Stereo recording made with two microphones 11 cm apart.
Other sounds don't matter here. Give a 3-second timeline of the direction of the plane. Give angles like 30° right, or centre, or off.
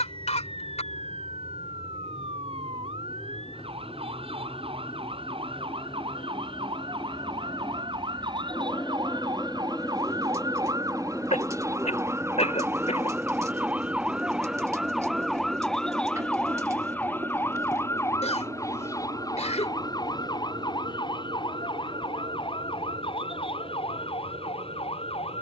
60° left, 50° left, 30° left, 10° left, 10° right, 30° right, 40° right, 50° right, 60° right.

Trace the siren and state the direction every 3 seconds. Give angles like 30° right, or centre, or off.
60° right, 60° right, 50° right, 40° right, 10° right, 10° left, 30° left, 50° left, 60° left.